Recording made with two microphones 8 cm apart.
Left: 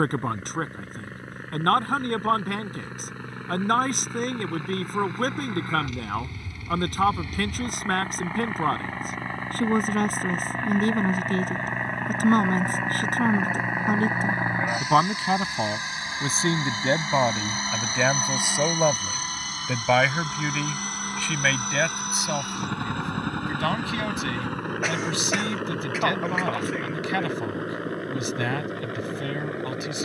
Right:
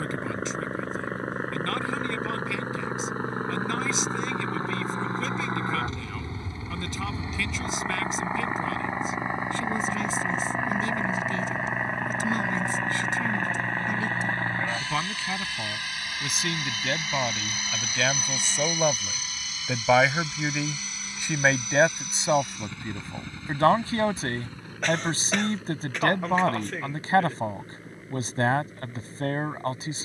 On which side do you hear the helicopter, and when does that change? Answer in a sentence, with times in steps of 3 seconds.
In this clip you hear the helicopter on the right from 0 s, in the centre from 9 s and on the left from 15 s.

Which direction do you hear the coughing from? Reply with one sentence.
In this clip you hear the coughing in the centre.